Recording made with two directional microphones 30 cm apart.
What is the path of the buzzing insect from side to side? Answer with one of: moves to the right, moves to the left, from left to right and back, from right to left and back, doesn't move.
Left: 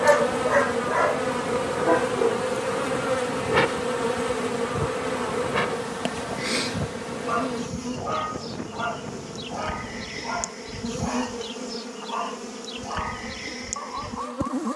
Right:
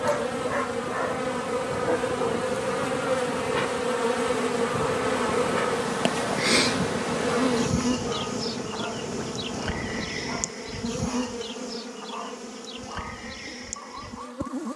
from left to right and back.